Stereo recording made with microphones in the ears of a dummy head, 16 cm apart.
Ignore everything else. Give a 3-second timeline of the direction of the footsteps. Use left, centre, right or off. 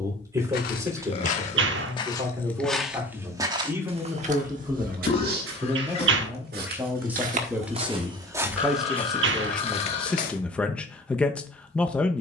left, right, right, left.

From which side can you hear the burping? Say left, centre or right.
left.